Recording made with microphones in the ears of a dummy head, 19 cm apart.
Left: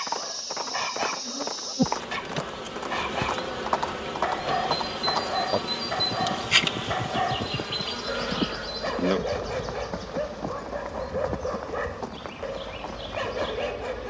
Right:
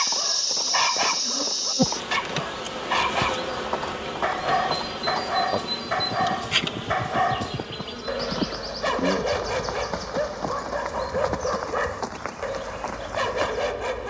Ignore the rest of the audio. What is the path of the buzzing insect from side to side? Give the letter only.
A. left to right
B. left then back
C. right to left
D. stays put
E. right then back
C.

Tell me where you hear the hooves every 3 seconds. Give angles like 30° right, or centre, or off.
40° left, 20° left, 10° right, 40° right, 50° right.